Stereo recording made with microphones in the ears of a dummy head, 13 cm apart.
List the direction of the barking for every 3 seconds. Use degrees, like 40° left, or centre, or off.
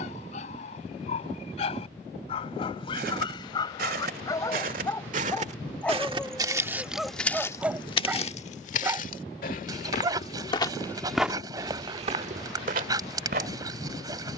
50° left, 20° left, 10° right, 30° right, 30° right.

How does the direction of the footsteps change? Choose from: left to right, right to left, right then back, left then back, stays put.
left then back.